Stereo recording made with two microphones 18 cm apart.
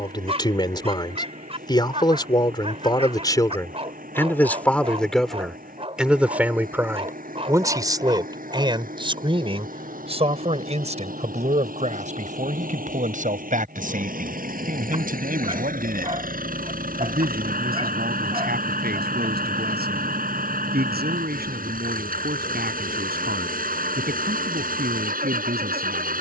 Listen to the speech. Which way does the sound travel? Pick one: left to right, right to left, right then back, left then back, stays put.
left to right.